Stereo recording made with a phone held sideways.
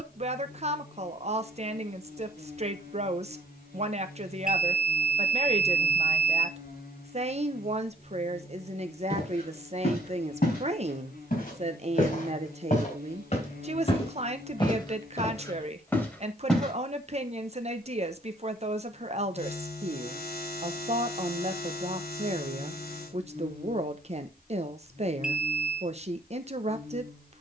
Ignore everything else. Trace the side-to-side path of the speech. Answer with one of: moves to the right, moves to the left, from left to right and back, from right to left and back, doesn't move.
doesn't move.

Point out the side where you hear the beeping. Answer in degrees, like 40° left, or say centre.
10° right.